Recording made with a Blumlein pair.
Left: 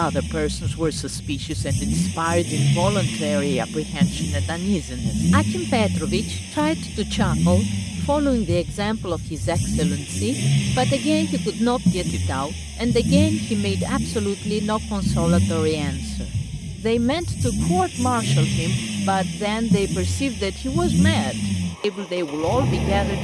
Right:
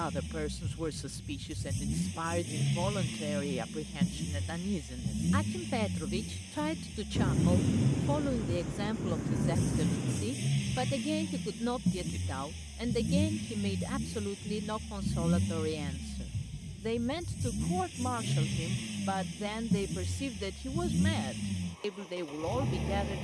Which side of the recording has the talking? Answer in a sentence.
In this clip you hear the talking on the left.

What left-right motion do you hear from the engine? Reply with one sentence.
You can hear the engine stay in one place.